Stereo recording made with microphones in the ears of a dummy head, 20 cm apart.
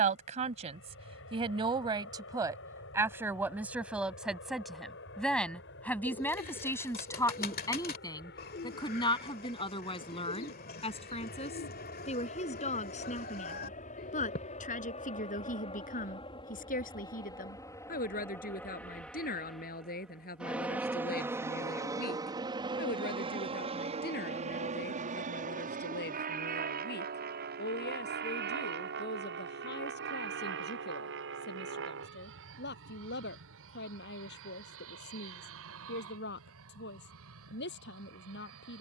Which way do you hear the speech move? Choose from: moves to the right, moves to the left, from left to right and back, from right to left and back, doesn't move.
moves to the left.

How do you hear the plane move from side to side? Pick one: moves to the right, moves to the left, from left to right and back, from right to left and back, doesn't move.
moves to the right.